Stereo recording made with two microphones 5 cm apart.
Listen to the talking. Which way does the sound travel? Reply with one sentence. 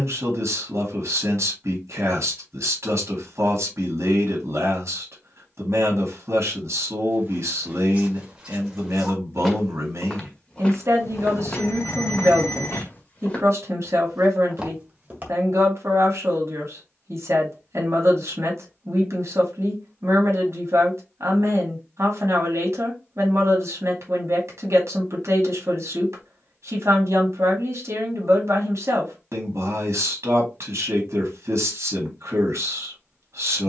You can hear the talking stay put.